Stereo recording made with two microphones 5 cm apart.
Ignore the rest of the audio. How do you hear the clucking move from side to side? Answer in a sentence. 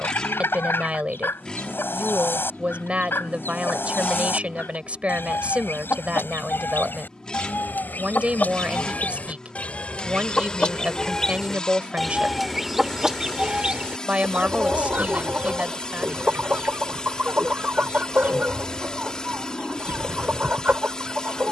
You can hear the clucking go from the left side to the right.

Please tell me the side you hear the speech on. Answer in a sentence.
You can hear the speech on the right.